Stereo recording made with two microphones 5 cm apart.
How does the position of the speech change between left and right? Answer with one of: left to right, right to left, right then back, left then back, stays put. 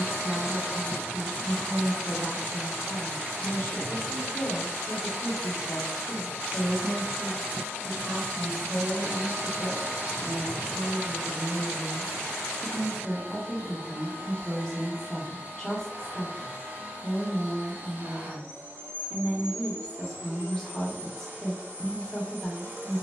right then back.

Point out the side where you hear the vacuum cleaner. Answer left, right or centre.
right.